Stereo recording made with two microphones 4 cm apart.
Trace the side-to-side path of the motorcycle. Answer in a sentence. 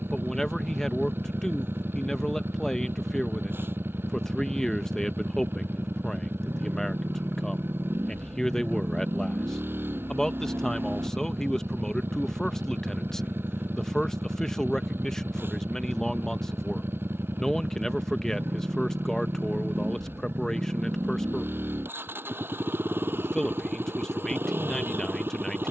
You can hear the motorcycle stay in one place.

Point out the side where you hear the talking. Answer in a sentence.
You can hear the talking in the centre.